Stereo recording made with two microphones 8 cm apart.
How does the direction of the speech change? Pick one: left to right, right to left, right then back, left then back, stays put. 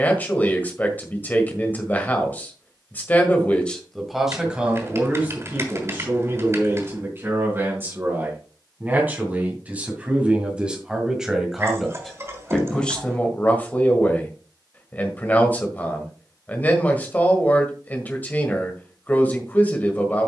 right then back.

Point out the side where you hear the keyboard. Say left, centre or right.
right.